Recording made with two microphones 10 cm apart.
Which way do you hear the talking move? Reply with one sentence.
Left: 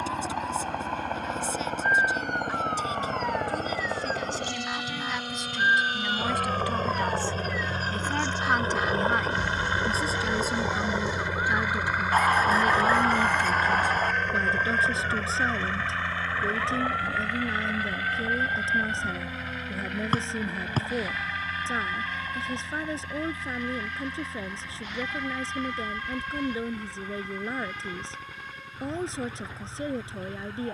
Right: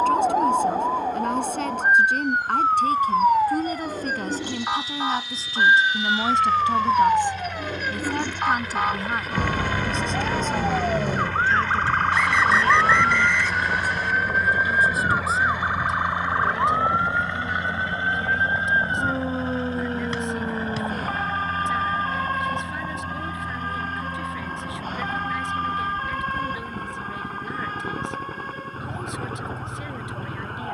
You can hear the talking go from the right side to the left.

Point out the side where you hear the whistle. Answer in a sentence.
In this clip you hear the whistle on the left.